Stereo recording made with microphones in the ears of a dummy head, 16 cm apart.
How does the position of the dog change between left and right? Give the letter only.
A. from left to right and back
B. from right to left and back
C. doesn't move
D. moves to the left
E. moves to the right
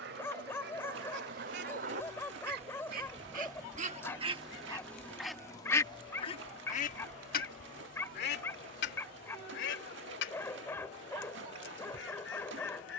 C.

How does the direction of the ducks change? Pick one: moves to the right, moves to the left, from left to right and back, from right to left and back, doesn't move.
moves to the left.